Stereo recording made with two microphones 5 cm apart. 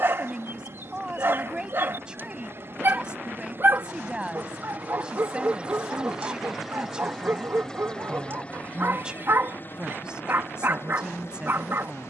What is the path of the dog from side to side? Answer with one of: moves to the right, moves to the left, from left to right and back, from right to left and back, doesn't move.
doesn't move.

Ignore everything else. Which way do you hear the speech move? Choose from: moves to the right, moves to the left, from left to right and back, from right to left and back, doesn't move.
doesn't move.